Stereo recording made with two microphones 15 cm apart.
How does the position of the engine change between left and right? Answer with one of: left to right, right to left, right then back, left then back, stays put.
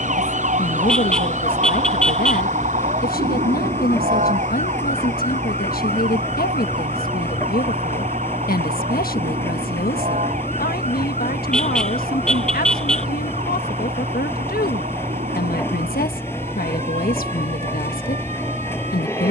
stays put.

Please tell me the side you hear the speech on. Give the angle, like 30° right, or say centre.
80° left.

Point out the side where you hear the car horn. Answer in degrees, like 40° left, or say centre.
centre.